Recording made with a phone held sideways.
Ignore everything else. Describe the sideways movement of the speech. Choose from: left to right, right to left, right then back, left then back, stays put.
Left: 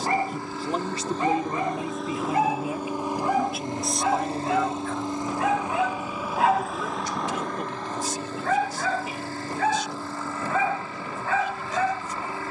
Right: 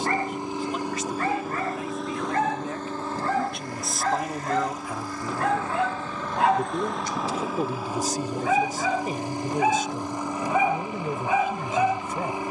left to right.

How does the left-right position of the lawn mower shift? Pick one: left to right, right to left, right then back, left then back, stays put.
left then back.